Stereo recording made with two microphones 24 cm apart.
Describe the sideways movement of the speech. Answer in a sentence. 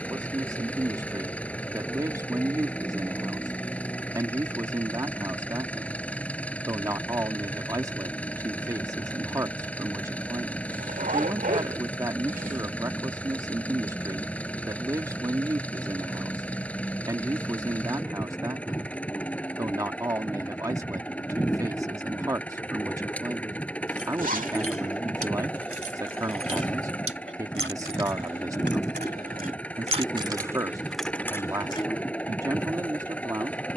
You can hear the speech stay put.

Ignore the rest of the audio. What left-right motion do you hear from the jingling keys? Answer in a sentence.
In this clip you hear the jingling keys move to the left.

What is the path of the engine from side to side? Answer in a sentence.
In this clip you hear the engine stay put.